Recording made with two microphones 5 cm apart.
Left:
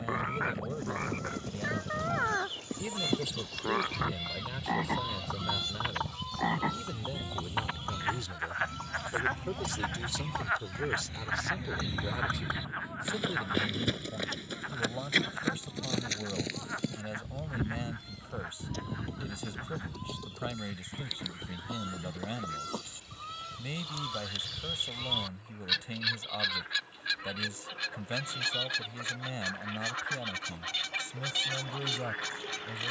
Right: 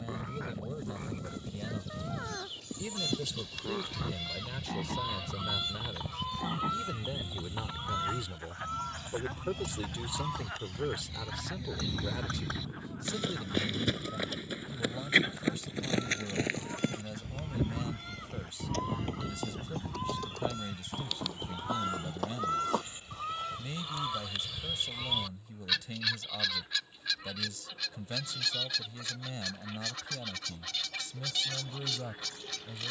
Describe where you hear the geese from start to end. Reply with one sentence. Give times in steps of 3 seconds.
In this clip you hear the geese on the left from 0 s, in the centre from 3 s, on the right from 6 s, in the centre from 24 s and on the left from 27 s.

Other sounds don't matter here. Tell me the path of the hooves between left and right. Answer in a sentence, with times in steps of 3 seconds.
You can hear the hooves on the left from 0 s, in the centre from 12 s, on the right from 15 s and not at all from 24 s.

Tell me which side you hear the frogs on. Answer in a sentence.
You can hear the frogs on the left.